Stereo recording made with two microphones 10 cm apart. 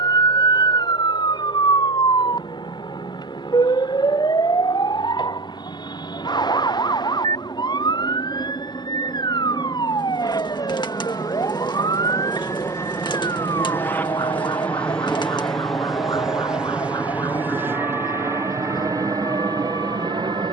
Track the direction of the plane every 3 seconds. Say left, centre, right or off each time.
left, left, left, left, left, centre, right.